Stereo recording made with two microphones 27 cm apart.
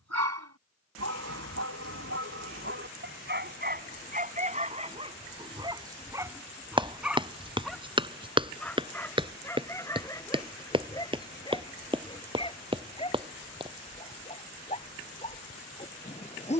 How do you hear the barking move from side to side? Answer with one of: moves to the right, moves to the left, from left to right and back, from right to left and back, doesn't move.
moves to the left.